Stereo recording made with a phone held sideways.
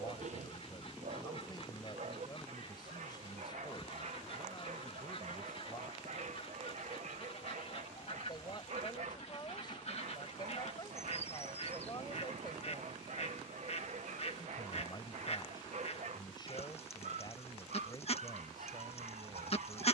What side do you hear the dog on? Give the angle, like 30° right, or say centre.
60° right.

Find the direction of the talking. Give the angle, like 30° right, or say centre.
30° left.